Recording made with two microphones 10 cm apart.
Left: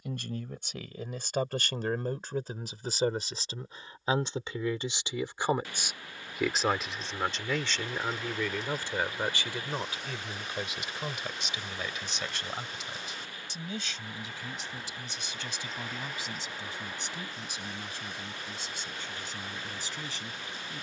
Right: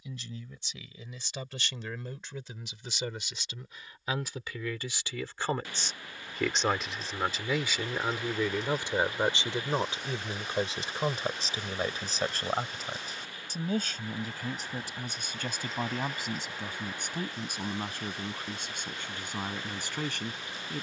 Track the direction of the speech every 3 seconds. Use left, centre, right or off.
left, left, centre, right, right, right, right.